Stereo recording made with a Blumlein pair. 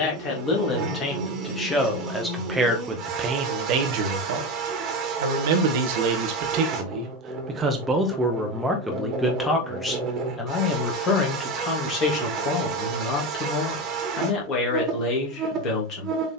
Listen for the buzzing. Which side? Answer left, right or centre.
right.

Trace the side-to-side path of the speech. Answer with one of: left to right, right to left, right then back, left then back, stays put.
right then back.